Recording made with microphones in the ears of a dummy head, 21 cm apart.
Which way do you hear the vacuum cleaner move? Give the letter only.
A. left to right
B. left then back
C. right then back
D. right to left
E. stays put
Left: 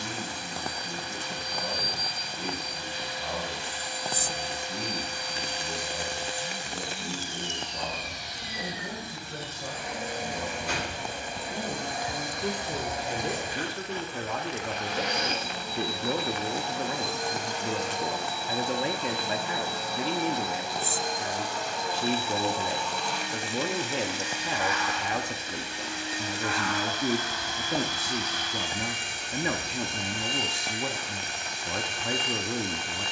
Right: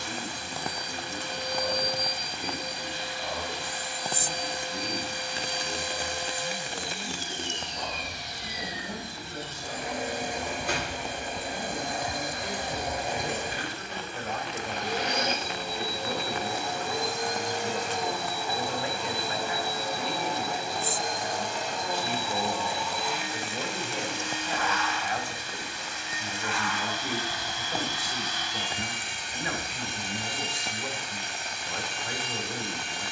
D.